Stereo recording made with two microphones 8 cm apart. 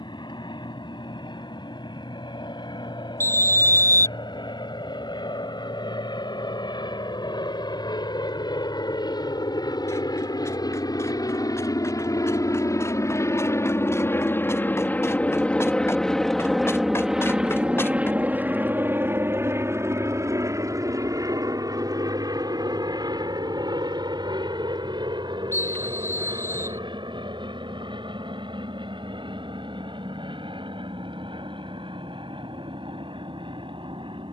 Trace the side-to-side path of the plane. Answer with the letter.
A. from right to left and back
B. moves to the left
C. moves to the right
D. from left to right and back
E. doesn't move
C.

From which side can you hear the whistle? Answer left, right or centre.
left.